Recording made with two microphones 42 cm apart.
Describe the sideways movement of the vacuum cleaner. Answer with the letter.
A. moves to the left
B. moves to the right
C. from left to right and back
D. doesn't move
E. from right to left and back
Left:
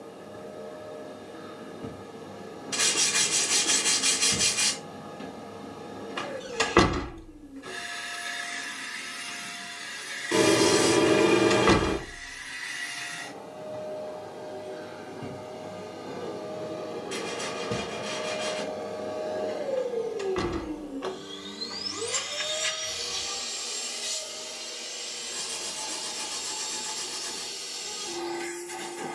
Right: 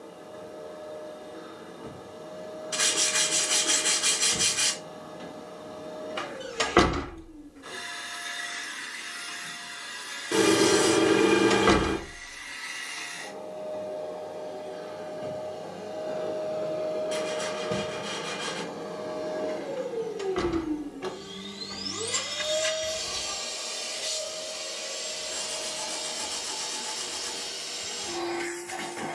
B.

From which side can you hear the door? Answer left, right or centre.
centre.